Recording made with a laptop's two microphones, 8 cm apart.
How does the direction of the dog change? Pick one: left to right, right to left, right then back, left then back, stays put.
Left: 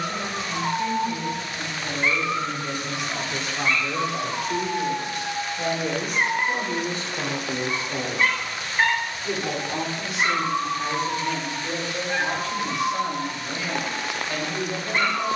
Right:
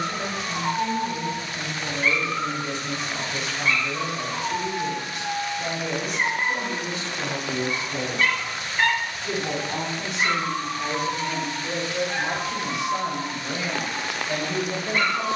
stays put.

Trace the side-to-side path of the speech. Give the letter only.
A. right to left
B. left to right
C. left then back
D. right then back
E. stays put
C.